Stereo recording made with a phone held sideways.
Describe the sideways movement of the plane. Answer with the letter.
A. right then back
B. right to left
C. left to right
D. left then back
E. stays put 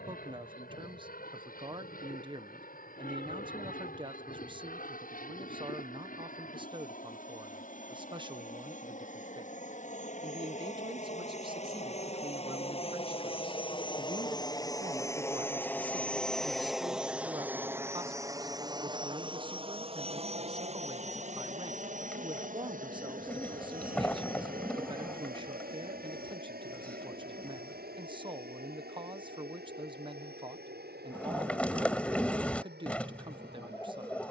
C.